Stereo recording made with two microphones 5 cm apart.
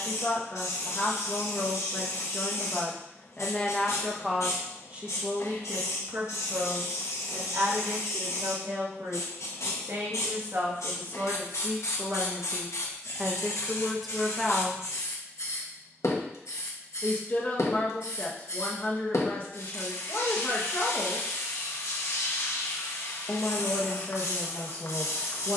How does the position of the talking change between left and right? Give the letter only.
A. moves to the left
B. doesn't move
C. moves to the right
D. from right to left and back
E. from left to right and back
E.